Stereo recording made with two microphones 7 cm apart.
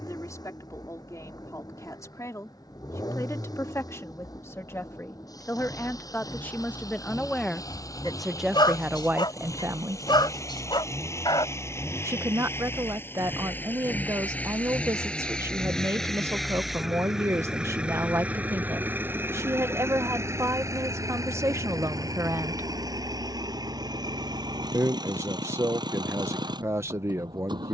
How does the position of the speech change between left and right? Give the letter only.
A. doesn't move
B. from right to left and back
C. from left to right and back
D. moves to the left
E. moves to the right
E.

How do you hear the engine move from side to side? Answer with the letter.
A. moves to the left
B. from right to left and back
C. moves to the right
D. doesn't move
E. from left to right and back
C.